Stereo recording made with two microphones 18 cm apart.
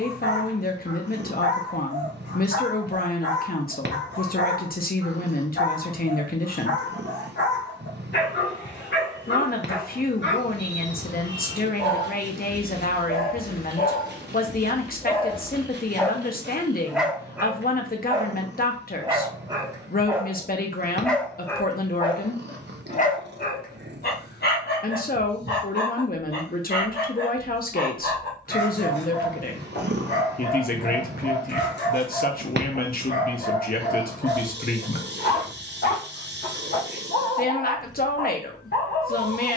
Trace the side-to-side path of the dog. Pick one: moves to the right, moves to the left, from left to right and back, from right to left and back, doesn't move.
from left to right and back.